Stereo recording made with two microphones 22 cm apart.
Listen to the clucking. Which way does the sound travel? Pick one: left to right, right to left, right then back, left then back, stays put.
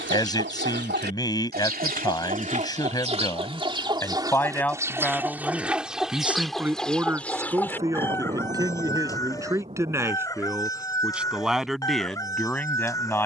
right to left.